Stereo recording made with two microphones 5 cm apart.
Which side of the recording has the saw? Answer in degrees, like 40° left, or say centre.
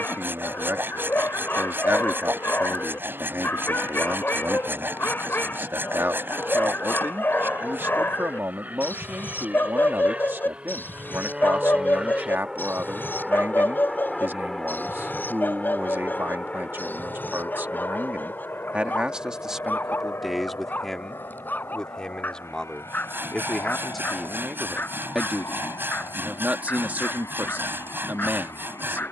50° right.